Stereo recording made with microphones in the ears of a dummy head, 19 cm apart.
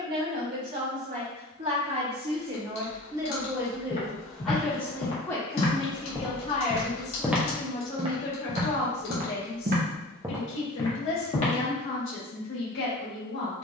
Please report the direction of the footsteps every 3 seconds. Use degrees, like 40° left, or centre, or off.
off, 30° left, 10° right, 10° right, off.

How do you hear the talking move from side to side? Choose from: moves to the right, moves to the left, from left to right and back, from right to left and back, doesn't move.
moves to the left.